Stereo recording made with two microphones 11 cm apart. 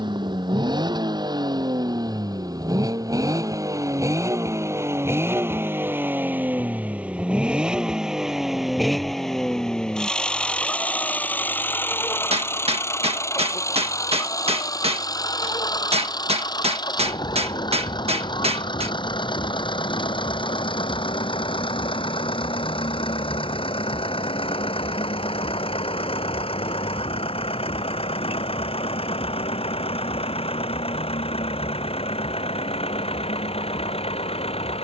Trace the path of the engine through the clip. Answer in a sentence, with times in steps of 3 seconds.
You can hear the engine on the right from 0 s, in the centre from 6 s and on the left from 12 s.